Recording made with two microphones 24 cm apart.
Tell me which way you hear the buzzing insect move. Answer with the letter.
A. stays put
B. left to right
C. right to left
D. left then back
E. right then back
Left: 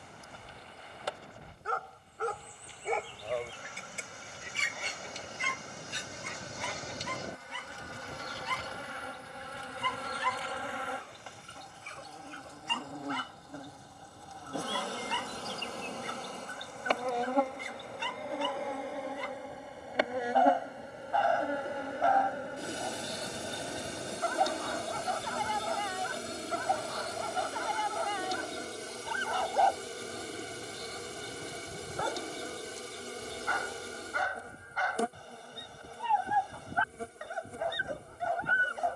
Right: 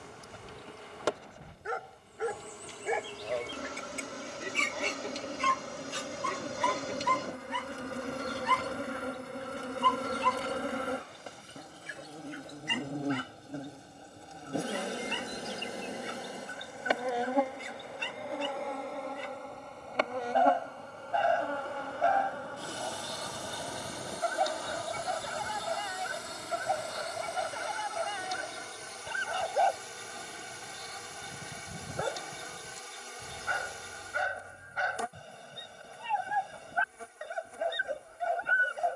C.